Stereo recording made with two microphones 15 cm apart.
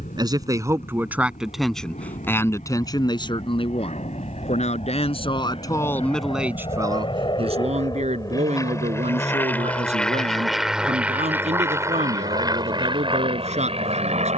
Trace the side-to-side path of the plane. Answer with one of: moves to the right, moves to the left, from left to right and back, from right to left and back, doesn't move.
moves to the right.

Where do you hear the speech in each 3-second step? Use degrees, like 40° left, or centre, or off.
centre, 40° left, 30° right, 50° right, 50° right.